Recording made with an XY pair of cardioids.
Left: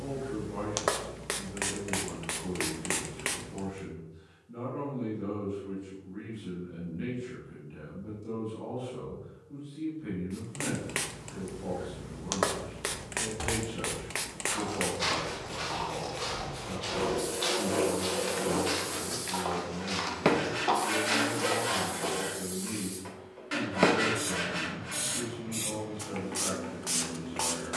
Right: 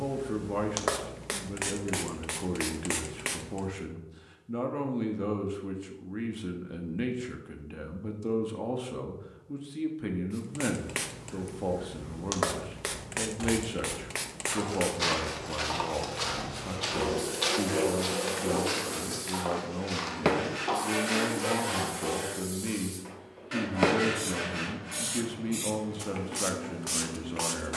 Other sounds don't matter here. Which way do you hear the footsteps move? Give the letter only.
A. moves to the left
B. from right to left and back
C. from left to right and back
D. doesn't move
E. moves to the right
C.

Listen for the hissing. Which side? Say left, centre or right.
centre.